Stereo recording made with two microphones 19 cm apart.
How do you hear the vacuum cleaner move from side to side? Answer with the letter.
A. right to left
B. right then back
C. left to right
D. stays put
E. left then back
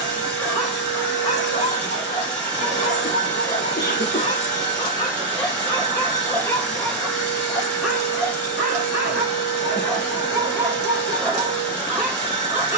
D.